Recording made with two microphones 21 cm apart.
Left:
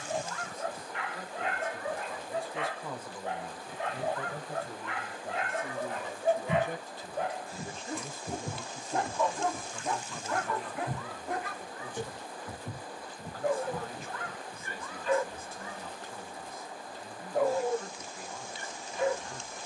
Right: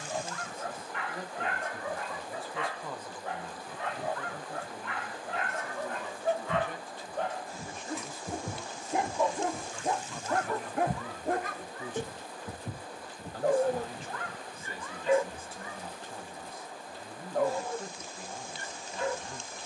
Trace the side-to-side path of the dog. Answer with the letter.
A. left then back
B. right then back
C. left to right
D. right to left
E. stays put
B.